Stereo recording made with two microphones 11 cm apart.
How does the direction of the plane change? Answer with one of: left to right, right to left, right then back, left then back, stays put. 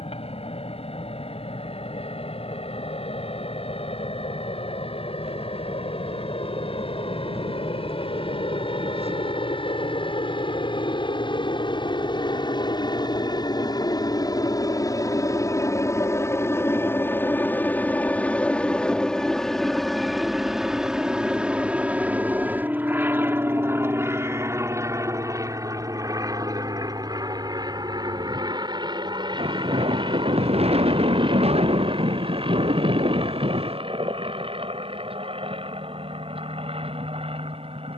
left to right.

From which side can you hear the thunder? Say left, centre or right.
right.